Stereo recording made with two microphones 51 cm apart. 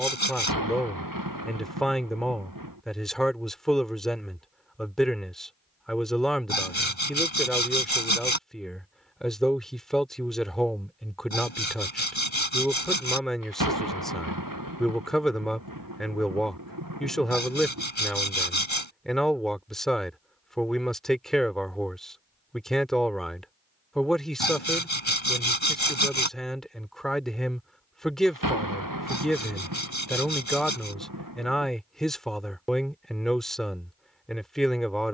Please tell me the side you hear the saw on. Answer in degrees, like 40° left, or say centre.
60° left.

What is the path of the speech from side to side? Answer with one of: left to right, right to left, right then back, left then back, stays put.
stays put.